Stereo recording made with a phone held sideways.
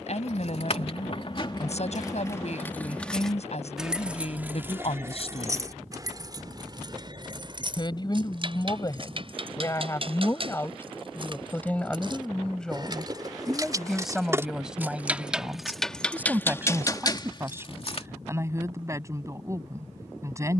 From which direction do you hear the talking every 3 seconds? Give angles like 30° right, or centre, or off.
60° left, 50° left, 30° left, 20° left, centre, 10° right, 20° right.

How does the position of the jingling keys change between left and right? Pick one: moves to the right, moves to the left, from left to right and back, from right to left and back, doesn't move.
from left to right and back.